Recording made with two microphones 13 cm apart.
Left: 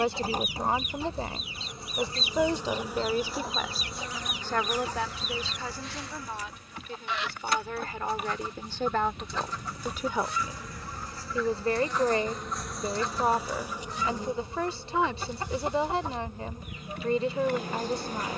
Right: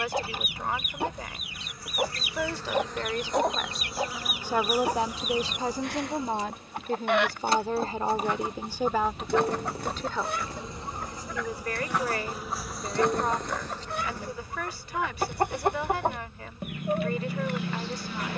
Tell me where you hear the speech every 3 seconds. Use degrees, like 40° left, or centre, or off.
30° left, 10° right, 30° right, 10° left, 30° left, 30° left.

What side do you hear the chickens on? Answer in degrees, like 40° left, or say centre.
60° right.